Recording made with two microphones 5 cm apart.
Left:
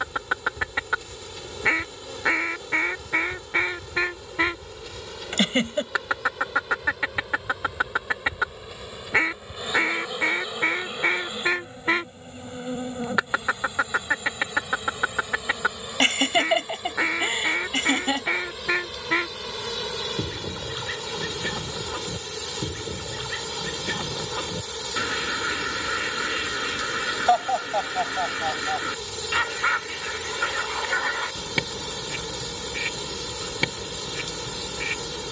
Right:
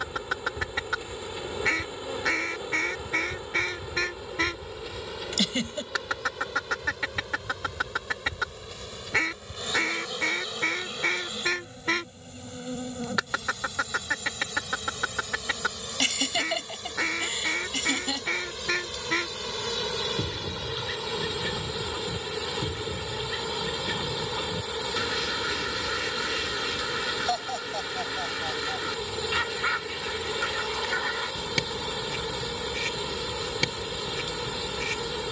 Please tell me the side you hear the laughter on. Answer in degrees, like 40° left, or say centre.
40° left.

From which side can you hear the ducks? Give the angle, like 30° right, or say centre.
20° left.